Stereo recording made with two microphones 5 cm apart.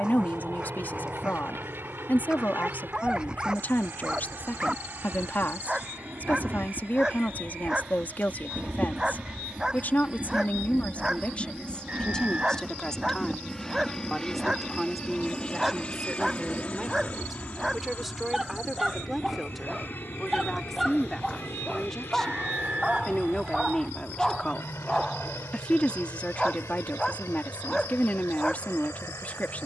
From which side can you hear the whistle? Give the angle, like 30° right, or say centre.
30° right.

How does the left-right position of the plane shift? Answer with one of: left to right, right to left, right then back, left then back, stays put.
right to left.